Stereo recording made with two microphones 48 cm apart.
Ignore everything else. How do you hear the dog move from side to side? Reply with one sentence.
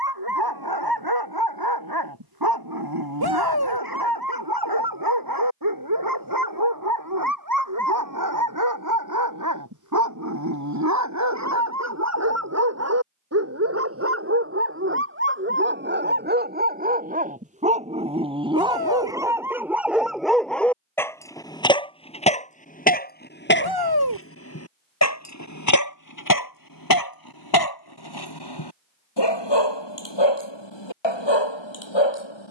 You can hear the dog travel towards the left.